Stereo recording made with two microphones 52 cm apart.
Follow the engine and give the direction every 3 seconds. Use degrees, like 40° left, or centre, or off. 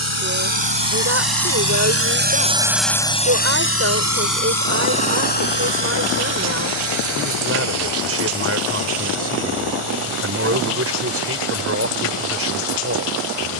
40° right, 40° left, 60° left, 70° left, 70° left.